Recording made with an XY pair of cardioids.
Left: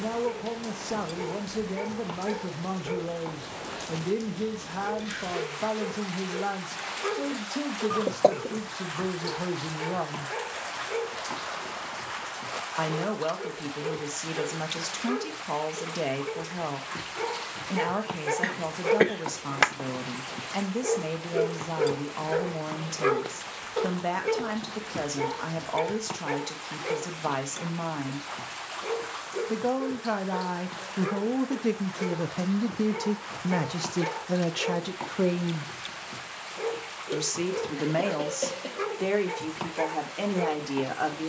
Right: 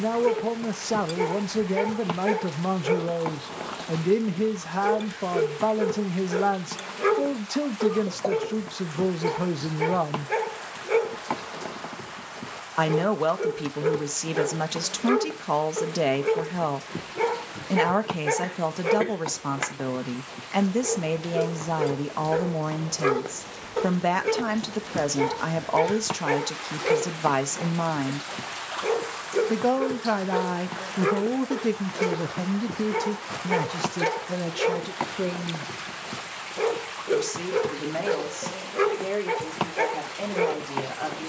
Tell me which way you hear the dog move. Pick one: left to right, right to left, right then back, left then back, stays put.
left then back.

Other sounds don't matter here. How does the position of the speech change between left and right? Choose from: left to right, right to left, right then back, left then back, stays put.
right to left.